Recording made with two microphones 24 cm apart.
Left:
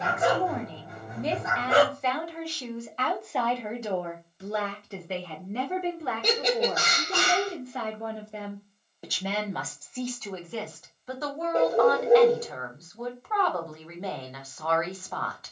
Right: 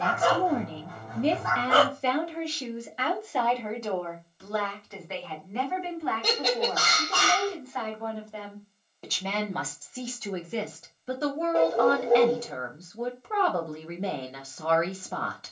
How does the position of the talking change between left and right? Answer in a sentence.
You can hear the talking go left and come back.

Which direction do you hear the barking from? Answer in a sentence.
In this clip you hear the barking on the left.